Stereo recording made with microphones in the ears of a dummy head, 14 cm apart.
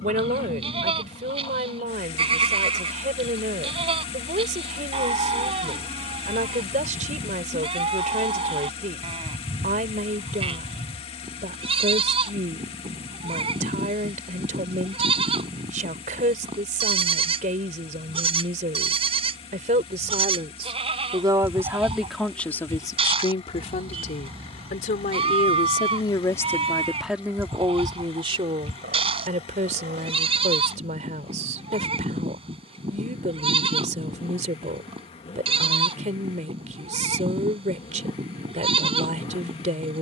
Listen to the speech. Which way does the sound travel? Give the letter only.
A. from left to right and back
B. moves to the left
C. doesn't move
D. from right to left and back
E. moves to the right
D.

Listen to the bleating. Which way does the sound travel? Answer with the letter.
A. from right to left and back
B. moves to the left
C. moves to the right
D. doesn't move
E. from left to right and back
D.